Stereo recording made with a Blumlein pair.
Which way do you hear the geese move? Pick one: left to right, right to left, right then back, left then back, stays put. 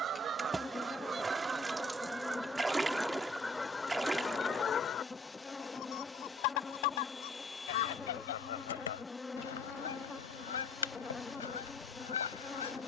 right to left.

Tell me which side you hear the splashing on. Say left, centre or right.
centre.